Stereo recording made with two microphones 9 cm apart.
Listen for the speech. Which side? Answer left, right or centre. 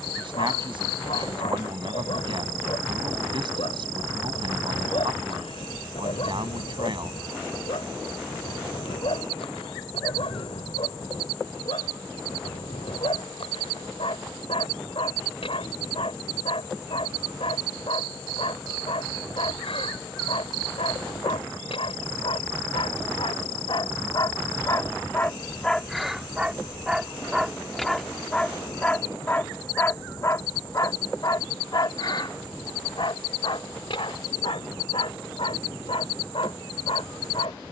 right.